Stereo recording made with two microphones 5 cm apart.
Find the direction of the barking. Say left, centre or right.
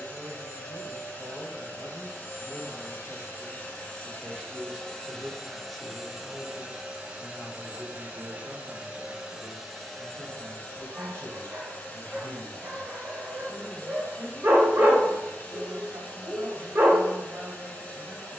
right.